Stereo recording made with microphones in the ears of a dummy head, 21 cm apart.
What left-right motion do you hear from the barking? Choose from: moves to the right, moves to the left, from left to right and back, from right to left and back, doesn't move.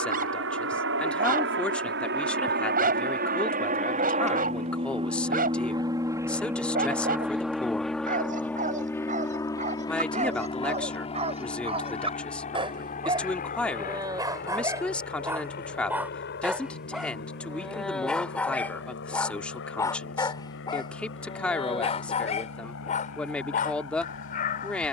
moves to the left.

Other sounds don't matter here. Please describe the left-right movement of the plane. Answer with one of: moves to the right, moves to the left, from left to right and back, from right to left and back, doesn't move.
moves to the left.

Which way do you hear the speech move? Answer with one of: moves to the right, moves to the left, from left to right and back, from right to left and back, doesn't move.
doesn't move.